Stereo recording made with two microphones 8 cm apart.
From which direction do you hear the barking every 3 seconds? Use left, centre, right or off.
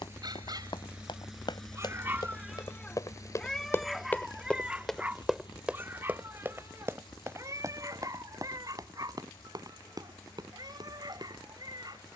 right, centre, right, right.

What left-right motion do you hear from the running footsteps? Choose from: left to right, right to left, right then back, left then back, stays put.
left to right.